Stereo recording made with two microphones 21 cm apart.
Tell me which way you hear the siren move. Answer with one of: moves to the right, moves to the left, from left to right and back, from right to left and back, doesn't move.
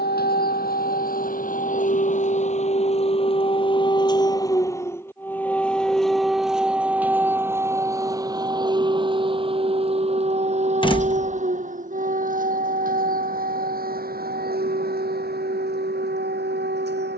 moves to the right.